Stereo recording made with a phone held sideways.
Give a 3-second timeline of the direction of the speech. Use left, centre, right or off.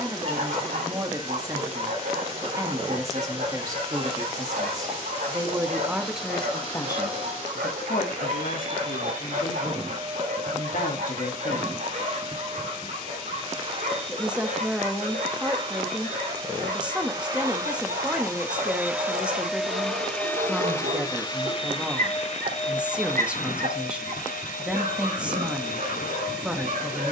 right, right, left, left, centre, centre, centre, centre, centre.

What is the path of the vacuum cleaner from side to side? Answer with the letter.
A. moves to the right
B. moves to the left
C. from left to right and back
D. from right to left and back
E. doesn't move
B.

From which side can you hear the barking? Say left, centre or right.
right.